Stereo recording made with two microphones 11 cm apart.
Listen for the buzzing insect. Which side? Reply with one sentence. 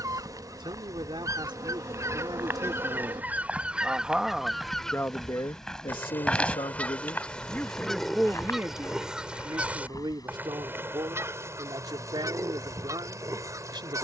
In this clip you hear the buzzing insect on the right.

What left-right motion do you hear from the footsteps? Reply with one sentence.
You can hear the footsteps go from the right side to the left.